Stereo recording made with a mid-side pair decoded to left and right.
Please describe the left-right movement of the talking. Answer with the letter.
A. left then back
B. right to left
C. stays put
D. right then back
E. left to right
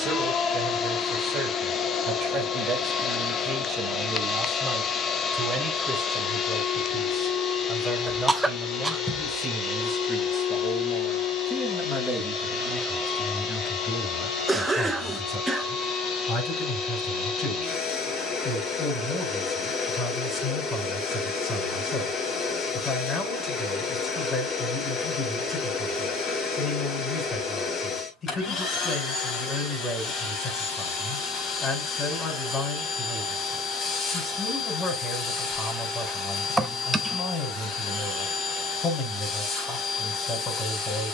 B.